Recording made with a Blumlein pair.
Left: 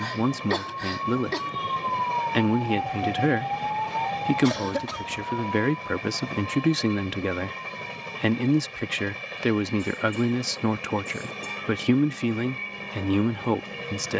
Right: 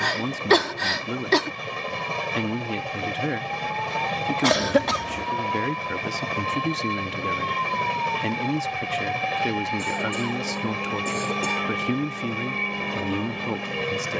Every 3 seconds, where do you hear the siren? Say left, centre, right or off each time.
left, centre, right, right, right.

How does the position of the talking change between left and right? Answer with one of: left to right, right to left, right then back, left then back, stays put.
stays put.